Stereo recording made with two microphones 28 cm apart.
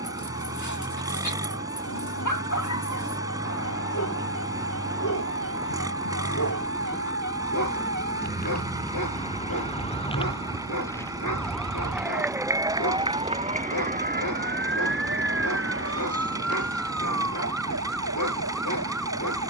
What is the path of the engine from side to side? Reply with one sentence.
You can hear the engine stay in one place.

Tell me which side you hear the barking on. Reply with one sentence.
In this clip you hear the barking on the left.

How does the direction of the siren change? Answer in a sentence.
You can hear the siren move from left to right.